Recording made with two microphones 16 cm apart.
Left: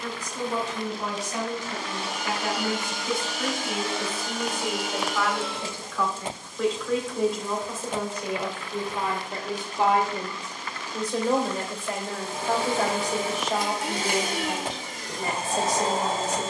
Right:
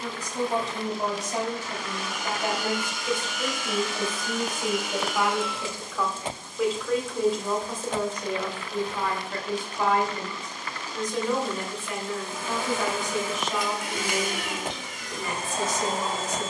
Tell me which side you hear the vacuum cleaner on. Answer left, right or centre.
left.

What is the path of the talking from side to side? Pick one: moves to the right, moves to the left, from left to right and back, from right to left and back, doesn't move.
moves to the left.